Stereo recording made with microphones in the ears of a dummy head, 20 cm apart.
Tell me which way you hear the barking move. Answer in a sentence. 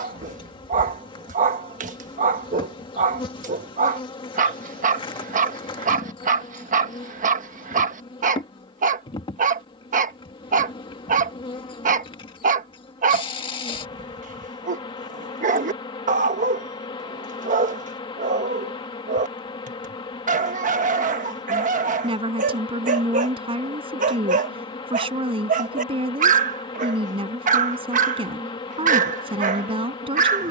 In this clip you hear the barking stay put.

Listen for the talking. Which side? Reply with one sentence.
You can hear the talking on the right.